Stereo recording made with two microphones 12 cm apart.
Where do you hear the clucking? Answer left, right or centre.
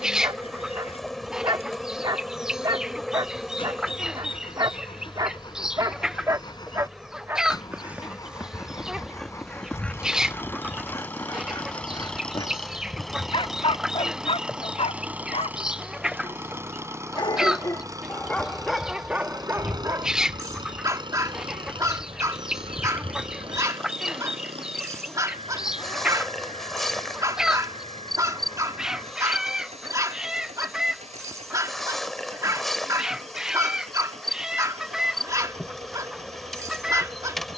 centre.